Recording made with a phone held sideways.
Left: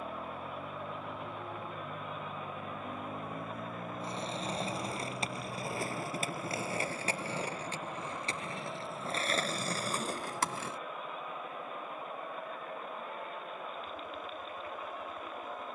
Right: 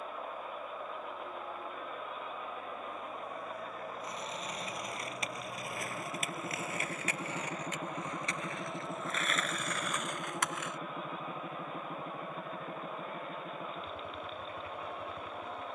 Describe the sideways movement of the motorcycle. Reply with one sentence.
In this clip you hear the motorcycle travel towards the right.